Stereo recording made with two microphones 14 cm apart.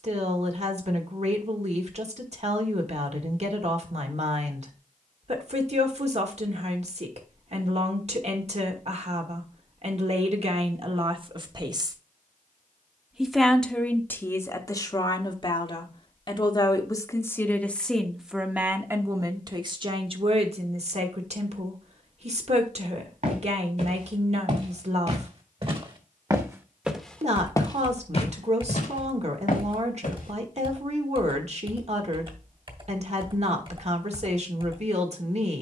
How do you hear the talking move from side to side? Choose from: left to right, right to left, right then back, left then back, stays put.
left then back.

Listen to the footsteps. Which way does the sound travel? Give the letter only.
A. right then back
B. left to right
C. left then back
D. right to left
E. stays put
D.